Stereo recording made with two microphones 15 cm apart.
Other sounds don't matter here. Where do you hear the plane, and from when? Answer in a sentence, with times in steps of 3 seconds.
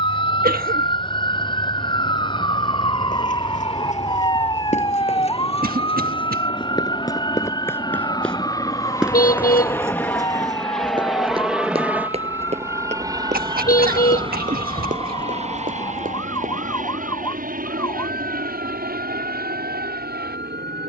In this clip you hear the plane on the left from 0 s, in the centre from 9 s and on the right from 12 s.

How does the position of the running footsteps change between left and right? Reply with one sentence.
In this clip you hear the running footsteps move from left to right.